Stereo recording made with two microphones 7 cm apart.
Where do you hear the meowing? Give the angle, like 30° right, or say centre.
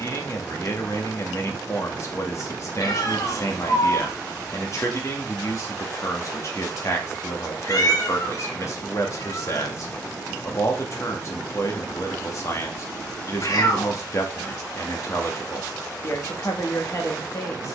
60° left.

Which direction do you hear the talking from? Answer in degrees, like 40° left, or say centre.
40° left.